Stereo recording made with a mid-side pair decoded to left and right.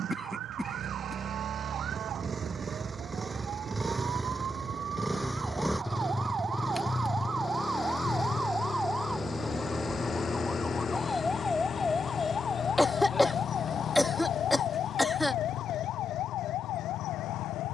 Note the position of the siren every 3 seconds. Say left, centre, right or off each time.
right, right, right, centre, left, left.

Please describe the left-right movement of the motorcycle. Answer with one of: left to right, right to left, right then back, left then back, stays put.
right to left.